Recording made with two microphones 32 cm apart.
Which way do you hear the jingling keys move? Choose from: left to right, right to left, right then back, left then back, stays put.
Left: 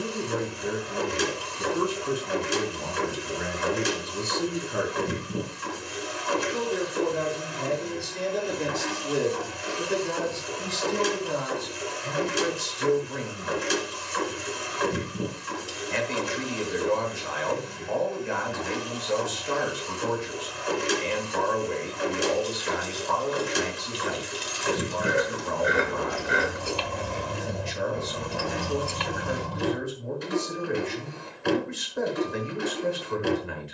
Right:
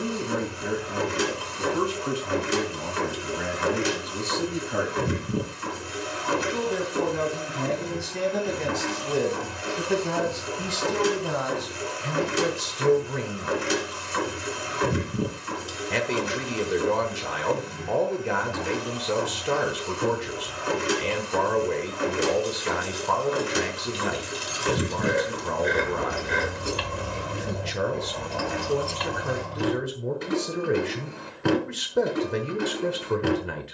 right to left.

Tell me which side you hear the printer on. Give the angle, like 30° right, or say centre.
70° right.